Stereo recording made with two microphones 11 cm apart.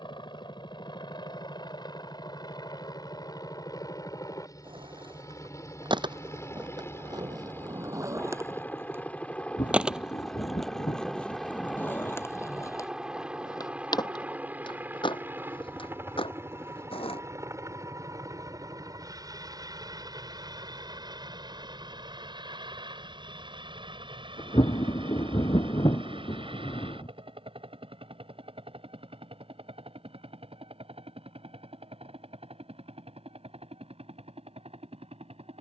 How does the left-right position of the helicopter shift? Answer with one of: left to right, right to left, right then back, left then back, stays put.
left to right.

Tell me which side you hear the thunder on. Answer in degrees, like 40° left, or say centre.
50° left.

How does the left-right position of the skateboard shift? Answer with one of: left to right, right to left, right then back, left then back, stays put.
right to left.